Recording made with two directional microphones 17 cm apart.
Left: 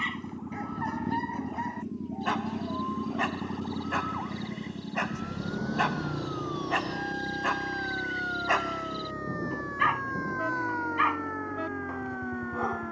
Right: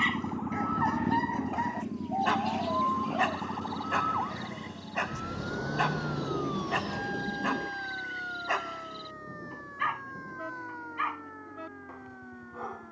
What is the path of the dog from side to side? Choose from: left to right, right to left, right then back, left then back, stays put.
right to left.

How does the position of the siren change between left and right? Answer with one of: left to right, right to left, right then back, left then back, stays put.
right to left.